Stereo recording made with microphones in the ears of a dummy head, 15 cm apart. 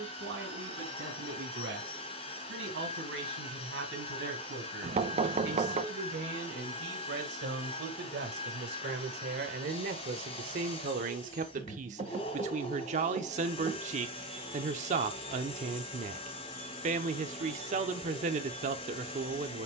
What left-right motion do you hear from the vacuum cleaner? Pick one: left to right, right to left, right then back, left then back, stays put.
stays put.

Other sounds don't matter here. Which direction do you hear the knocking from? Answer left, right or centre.
right.